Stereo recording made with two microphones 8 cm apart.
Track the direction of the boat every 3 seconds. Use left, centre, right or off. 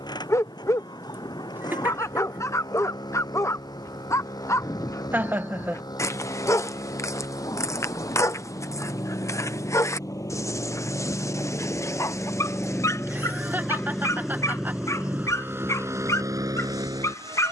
left, left, left, left, centre, right.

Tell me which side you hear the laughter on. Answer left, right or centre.
right.